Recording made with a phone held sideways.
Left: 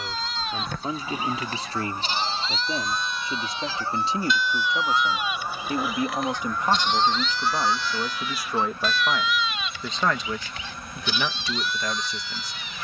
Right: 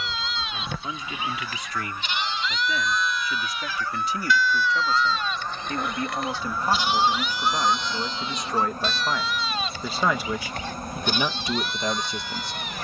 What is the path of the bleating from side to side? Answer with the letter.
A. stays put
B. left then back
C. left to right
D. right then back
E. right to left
C.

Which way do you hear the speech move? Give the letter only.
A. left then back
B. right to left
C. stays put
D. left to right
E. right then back
D.